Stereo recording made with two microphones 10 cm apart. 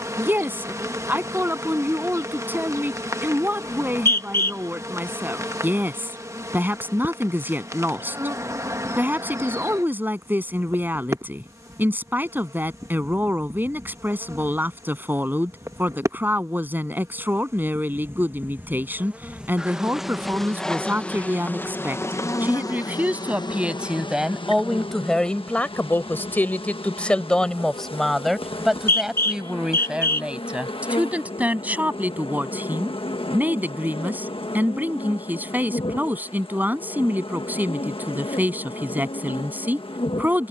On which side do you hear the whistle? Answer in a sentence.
You can hear the whistle on the left.